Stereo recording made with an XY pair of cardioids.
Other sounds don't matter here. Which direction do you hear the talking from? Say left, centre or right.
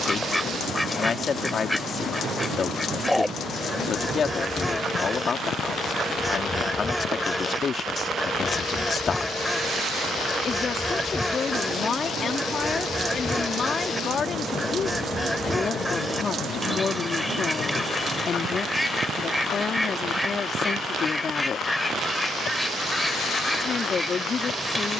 left.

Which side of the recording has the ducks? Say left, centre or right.
centre.